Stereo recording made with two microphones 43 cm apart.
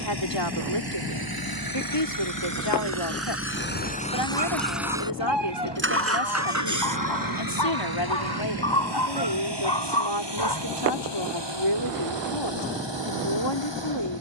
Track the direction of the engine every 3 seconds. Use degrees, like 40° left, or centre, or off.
50° left, 10° left, 50° right, 70° right, 70° right.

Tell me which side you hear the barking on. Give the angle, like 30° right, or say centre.
70° left.